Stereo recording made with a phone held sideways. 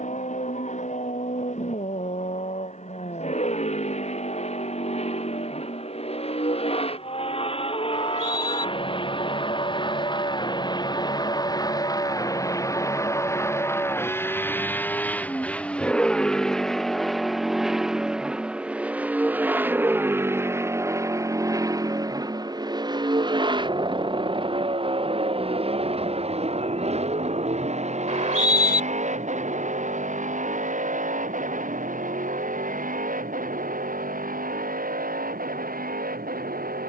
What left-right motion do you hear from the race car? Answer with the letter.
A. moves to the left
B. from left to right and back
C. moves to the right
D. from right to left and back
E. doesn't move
C.